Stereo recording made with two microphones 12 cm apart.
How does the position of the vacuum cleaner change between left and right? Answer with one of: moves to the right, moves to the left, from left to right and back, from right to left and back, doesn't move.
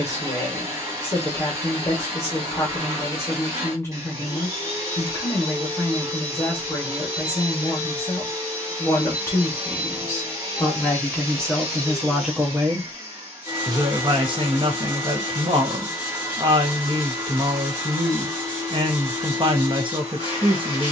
doesn't move.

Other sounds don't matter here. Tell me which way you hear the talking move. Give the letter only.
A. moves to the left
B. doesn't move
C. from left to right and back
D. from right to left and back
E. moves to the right
E.